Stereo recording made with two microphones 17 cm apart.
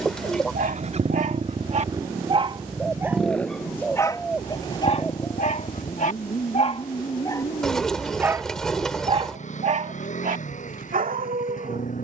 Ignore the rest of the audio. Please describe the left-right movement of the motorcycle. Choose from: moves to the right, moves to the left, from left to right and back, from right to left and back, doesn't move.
moves to the left.